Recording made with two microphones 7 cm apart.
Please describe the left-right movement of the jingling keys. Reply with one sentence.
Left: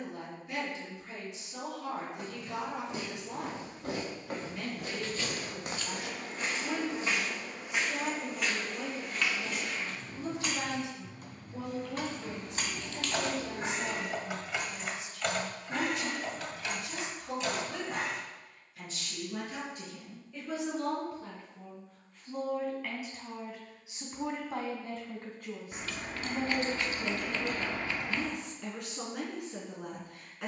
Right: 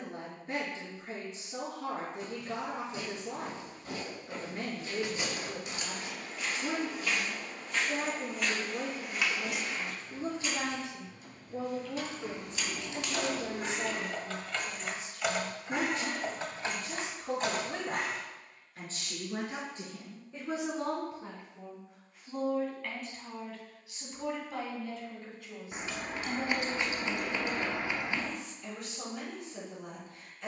You can hear the jingling keys travel towards the right.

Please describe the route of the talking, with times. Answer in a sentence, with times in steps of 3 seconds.
In this clip you hear the talking on the right from 0 s, in the centre from 21 s and on the left from 24 s.